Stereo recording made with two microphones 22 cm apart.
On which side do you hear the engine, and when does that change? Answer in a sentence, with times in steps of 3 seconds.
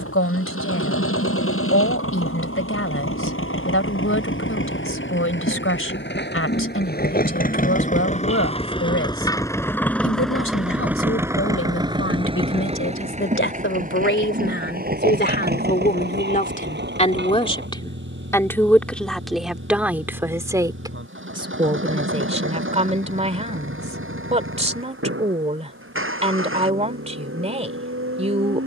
In this clip you hear the engine on the left from 0 s, in the centre from 9 s and on the right from 12 s.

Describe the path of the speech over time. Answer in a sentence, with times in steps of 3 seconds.
You can hear the speech on the left from 0 s, in the centre from 18 s and on the right from 21 s.